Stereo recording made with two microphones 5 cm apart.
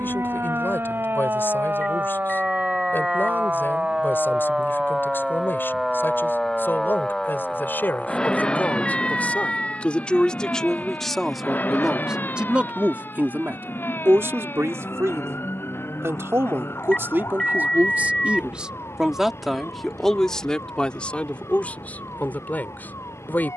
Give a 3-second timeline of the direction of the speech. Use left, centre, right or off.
left, left, left, centre, right, right, centre, left.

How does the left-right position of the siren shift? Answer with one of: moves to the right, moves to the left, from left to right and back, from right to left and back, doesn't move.
moves to the left.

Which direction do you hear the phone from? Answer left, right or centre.
centre.